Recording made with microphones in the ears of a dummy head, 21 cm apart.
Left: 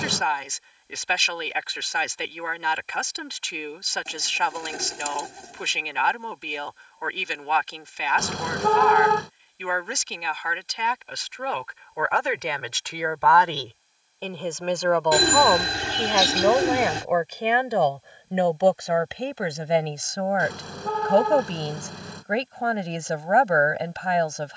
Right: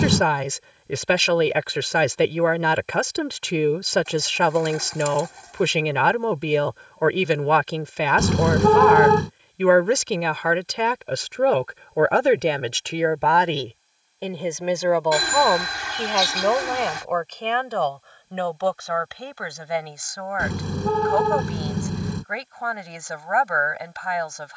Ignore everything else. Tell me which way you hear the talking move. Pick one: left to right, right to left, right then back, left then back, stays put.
right to left.